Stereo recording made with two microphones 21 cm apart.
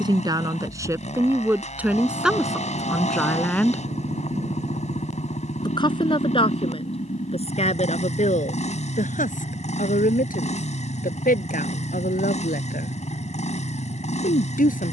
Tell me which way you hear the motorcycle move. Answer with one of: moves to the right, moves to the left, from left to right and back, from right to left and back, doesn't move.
doesn't move.